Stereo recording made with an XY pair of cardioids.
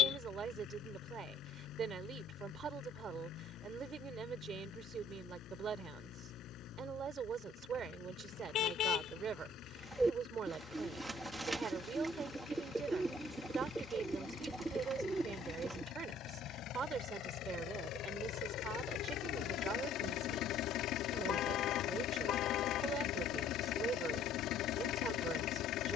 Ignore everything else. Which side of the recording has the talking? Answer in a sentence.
You can hear the talking on the right.